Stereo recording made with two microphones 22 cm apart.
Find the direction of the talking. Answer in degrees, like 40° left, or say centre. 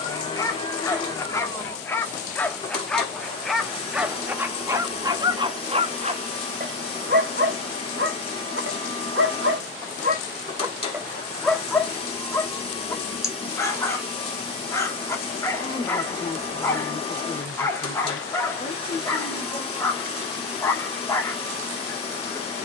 40° left.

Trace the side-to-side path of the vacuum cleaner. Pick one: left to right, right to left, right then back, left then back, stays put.
stays put.